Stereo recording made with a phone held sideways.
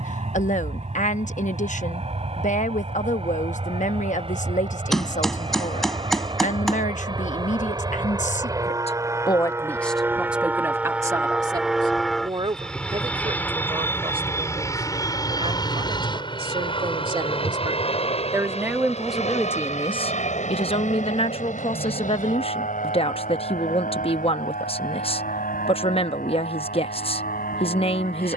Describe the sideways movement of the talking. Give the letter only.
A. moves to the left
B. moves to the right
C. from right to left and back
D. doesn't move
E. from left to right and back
E.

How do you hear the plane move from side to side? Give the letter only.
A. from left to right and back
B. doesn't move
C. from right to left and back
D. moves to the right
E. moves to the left
E.